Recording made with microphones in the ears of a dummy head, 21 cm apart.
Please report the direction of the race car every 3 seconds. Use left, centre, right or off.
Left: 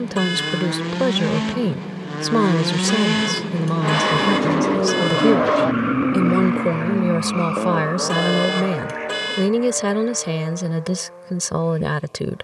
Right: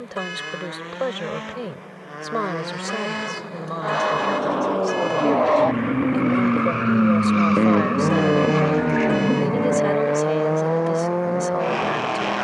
left, left, right, right.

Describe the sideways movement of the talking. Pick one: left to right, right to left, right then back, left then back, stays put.
stays put.